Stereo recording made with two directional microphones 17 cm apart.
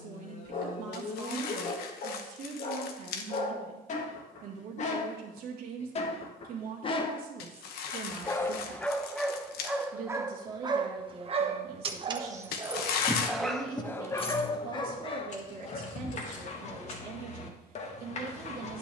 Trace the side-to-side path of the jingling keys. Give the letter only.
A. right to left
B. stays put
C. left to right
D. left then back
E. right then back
A.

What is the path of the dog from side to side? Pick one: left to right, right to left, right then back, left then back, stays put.
right then back.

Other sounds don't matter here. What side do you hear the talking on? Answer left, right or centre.
right.